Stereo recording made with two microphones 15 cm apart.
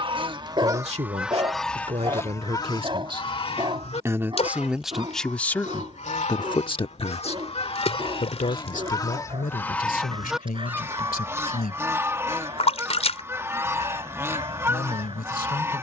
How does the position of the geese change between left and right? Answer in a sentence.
In this clip you hear the geese move from right to left and back again.